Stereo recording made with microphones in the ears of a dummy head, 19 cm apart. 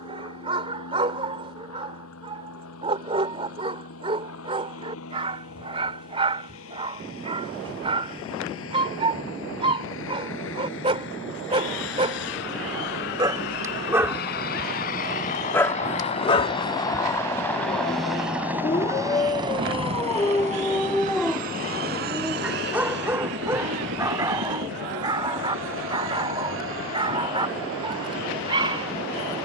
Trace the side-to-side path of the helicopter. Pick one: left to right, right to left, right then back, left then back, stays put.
left to right.